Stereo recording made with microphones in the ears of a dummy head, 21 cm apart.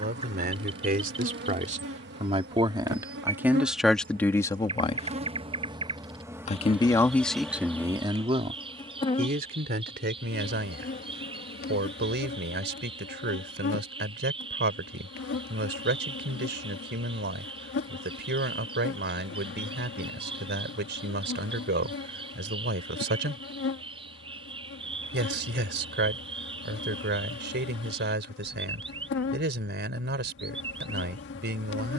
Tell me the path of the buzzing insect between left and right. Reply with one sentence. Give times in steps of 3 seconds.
In this clip you hear the buzzing insect on the right from 0 s, in the centre from 6 s and on the left from 9 s.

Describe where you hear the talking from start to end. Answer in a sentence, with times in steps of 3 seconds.
In this clip you hear the talking on the right from 0 s, in the centre from 3 s and on the right from 9 s.